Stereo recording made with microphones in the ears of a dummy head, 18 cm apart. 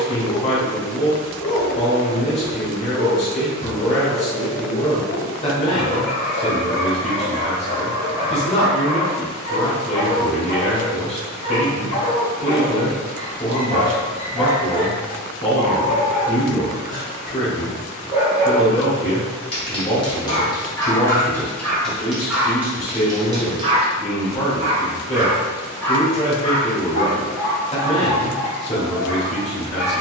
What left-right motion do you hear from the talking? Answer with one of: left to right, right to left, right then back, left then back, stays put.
stays put.